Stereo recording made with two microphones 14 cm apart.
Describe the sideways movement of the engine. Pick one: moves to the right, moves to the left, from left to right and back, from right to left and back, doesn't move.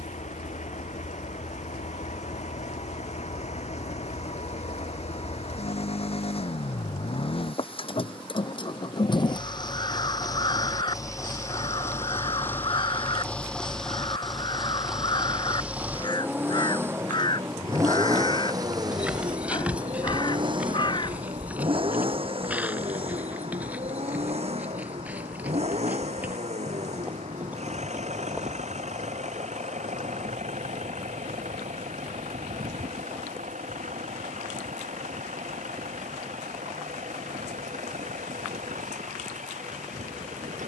moves to the right.